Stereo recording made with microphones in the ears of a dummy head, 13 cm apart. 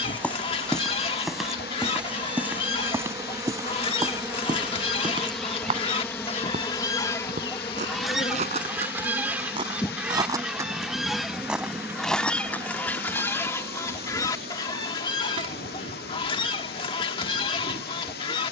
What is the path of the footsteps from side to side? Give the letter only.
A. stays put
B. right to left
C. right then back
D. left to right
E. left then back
C.